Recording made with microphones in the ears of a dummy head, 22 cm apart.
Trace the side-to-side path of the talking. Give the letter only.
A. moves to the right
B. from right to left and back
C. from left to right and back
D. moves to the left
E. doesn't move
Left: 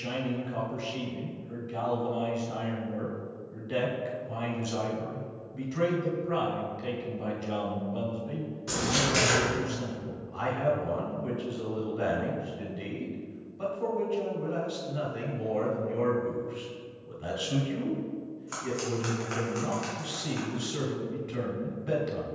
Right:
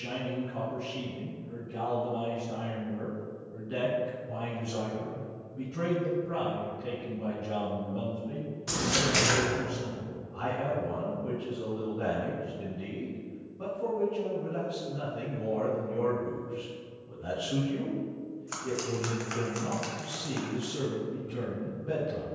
E.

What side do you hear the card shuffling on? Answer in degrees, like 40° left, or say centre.
10° right.